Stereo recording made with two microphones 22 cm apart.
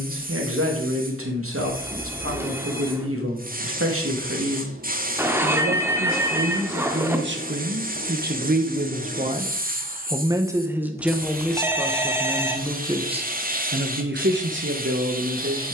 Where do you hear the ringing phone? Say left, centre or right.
centre.